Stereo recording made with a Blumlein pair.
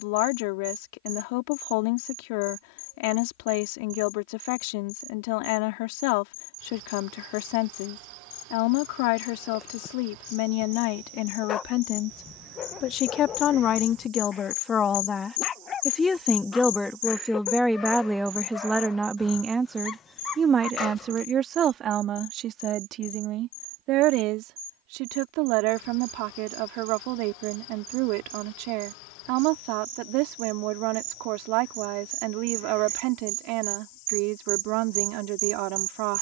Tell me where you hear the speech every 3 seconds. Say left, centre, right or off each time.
left, left, left, left, left, centre, centre, right, right, right, right, right.